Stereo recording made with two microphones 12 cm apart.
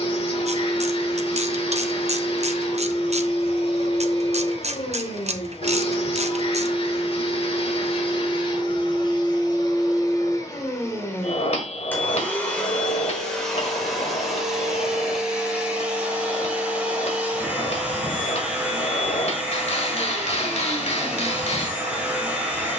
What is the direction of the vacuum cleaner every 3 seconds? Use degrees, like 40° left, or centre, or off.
50° left, 50° left, 50° left, 30° left, centre, 10° right, 10° right, 10° right.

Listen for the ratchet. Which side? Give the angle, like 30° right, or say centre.
60° right.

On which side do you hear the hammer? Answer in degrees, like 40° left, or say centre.
60° left.